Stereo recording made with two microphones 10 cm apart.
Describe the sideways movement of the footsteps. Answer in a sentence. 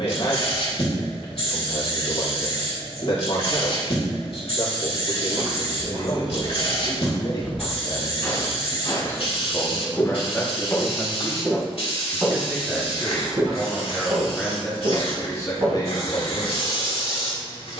You can hear the footsteps move from right to left and back again.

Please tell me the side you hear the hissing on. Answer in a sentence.
You can hear the hissing on the left.